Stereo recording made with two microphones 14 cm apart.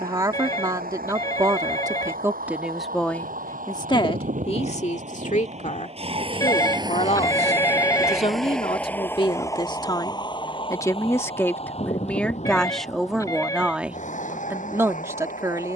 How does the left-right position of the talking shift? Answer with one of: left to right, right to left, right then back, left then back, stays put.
left then back.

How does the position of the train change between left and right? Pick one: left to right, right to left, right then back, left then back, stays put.
right to left.